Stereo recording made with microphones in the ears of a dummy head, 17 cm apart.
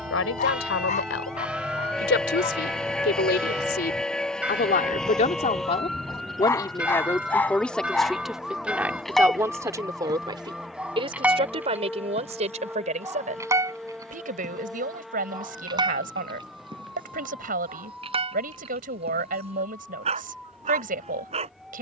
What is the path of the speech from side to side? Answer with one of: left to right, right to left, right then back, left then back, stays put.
left to right.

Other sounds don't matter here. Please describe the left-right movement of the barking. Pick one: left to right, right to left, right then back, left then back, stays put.
left to right.